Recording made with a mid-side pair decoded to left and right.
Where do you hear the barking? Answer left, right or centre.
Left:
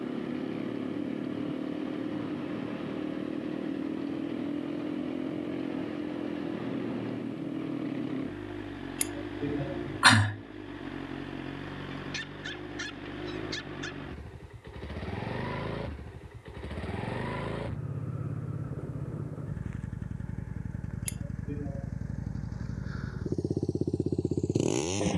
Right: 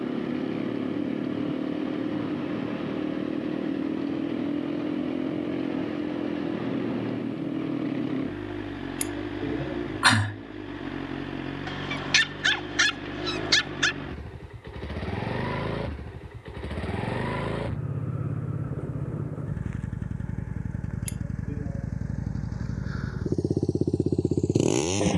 right.